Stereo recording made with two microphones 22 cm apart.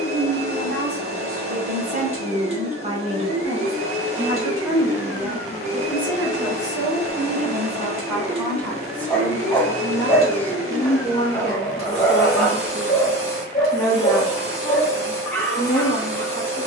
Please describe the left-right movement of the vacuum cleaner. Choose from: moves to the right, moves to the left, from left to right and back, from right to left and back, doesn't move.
doesn't move.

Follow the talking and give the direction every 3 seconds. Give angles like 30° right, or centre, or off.
40° right, 20° right, centre, 10° left, 10° left, 10° left.